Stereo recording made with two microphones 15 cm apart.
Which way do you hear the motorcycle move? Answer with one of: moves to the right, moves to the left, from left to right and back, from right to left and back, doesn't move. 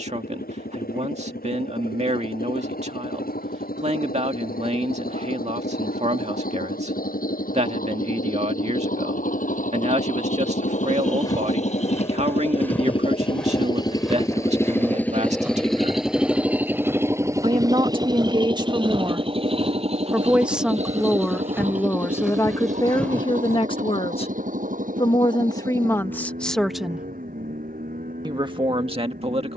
moves to the right.